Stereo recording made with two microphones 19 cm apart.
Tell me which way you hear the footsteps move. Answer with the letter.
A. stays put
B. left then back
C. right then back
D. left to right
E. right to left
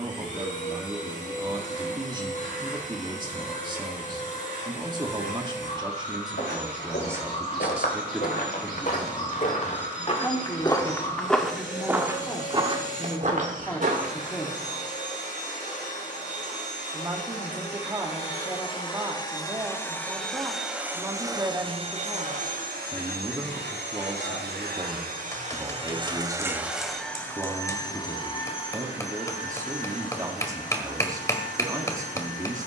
D.